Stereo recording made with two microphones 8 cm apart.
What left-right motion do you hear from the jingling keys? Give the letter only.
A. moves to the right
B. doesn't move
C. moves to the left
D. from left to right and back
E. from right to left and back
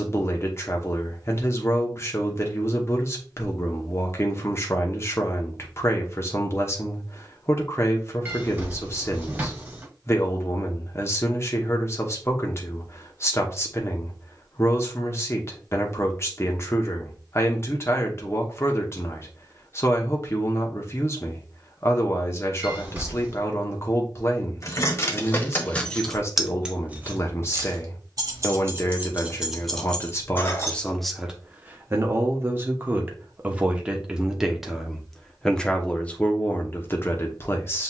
D.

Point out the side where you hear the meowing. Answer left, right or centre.
right.